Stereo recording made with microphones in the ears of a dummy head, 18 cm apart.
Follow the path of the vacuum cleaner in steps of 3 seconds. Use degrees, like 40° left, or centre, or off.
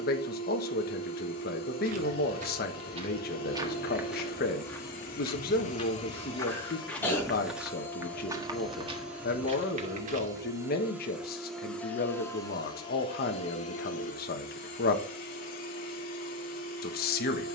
50° left, 40° left, 20° left, 10° right, 30° left, 40° left.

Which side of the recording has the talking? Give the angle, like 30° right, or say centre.
50° left.